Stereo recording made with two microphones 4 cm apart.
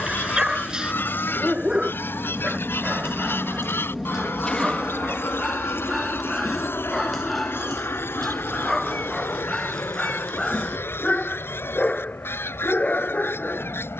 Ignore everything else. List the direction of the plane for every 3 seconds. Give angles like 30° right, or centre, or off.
20° right, 20° left, 50° left, 70° left, 70° left.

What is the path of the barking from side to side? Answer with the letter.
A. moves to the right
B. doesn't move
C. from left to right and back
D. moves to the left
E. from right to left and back
D.